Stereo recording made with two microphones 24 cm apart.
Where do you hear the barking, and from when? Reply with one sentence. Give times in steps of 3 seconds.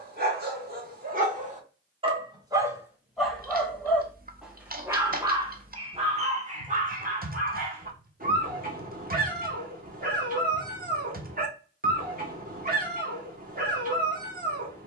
In this clip you hear the barking on the right from 0 s, in the centre from 3 s and on the right from 6 s.